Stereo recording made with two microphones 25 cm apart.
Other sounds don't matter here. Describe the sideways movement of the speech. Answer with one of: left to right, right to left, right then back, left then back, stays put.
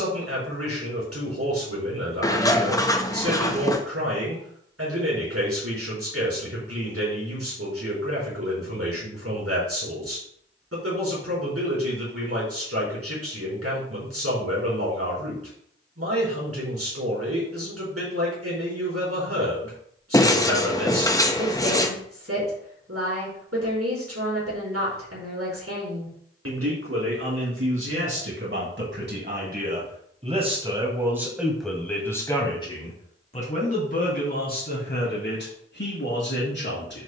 right to left.